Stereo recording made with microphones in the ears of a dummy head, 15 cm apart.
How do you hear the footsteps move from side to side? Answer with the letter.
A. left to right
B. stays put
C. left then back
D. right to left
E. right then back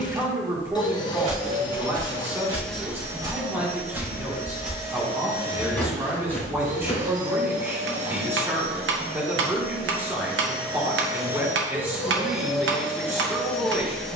D.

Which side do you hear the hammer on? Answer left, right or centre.
right.